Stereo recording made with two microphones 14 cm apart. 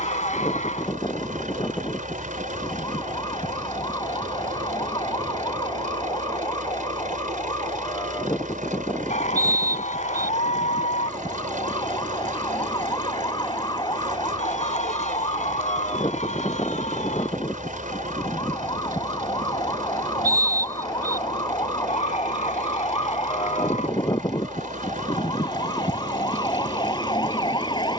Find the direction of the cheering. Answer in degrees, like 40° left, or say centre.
60° left.